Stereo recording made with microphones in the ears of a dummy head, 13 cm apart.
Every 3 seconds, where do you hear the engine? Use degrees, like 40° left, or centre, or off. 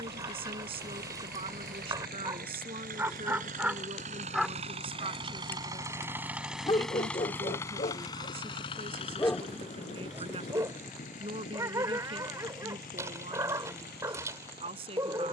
70° right, 40° right, 20° left, 50° left, 60° left.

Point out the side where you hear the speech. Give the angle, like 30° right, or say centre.
40° right.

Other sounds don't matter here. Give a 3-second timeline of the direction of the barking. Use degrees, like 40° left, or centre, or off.
20° right, 10° right, 40° left, 10° right, 20° right.